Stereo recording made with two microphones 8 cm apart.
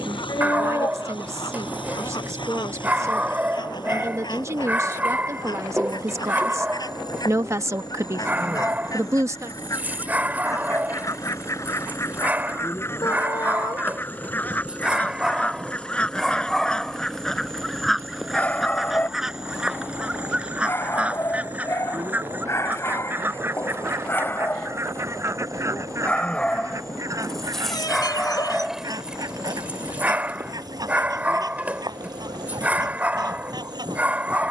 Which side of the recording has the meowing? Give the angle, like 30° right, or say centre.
50° left.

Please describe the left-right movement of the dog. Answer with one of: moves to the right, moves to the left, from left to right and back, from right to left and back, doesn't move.
from right to left and back.